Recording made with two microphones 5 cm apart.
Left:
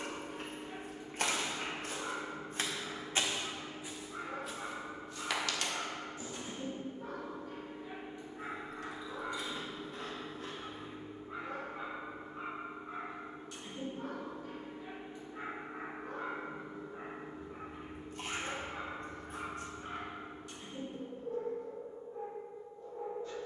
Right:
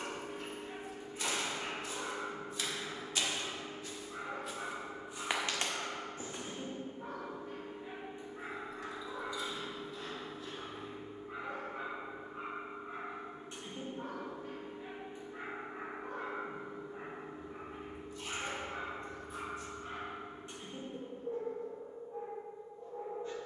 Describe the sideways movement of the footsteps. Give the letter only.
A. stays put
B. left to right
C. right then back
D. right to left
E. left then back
B.